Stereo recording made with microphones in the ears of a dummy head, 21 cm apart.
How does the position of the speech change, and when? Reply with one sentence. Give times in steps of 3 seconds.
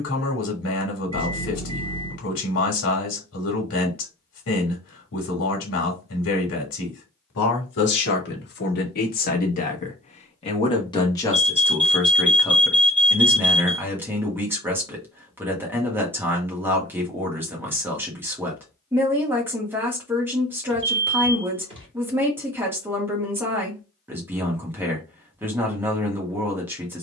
In this clip you hear the speech on the left from 0 s and in the centre from 12 s.